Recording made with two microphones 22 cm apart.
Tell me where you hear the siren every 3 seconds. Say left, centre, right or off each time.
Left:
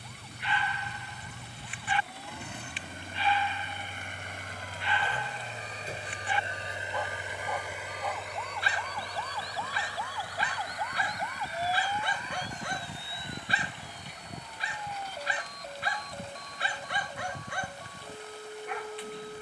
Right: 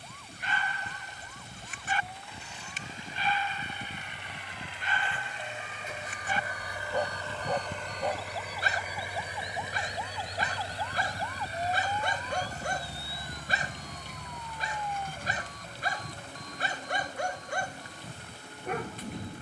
right, right, right, centre, left, left, left.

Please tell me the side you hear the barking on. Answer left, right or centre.
right.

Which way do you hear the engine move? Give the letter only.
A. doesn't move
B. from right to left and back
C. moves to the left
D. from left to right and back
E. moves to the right
E.